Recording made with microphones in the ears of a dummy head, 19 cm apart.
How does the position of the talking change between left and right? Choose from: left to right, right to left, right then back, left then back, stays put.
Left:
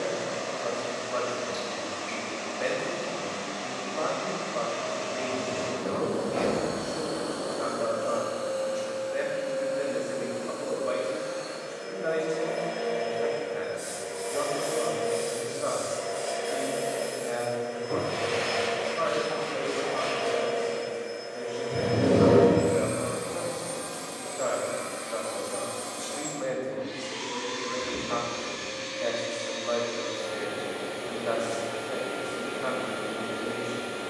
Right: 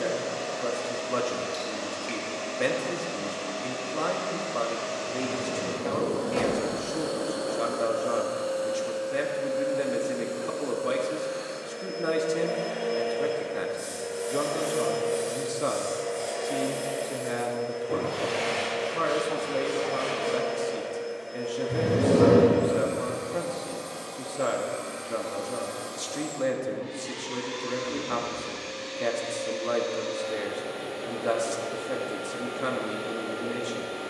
stays put.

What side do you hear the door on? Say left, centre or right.
right.